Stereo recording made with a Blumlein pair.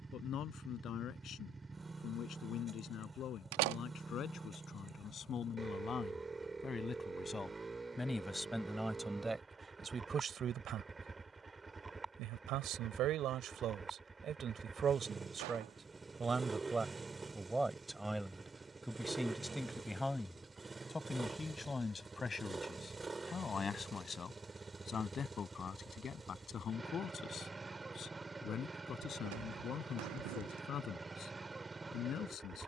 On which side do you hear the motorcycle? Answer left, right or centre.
centre.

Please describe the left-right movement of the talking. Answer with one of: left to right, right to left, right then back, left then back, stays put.
right then back.